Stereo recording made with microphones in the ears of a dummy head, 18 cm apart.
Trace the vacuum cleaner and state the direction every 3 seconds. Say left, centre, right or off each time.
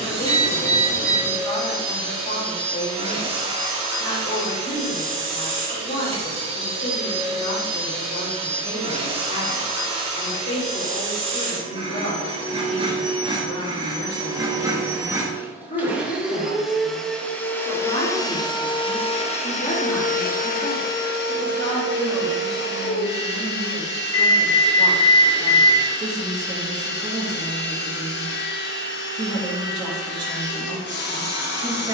right, right, right, right, right, centre, left, left, left, left, left.